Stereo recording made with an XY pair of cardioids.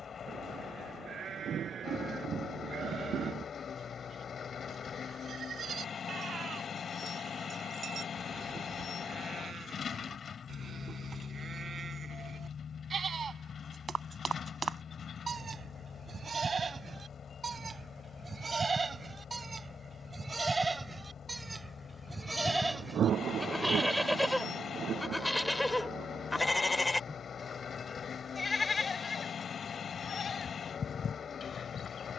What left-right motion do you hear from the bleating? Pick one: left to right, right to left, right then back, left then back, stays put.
right to left.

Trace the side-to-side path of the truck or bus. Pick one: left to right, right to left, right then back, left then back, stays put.
stays put.